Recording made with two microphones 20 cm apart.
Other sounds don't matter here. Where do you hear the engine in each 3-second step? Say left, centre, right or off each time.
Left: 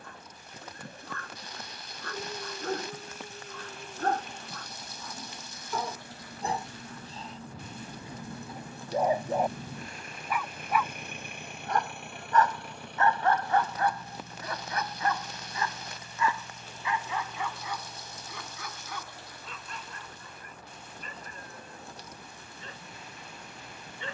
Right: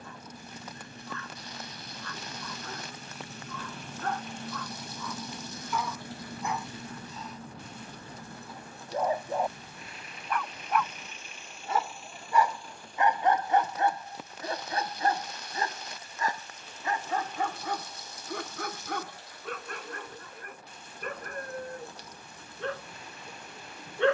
right, right, centre, left, left, left, left, left.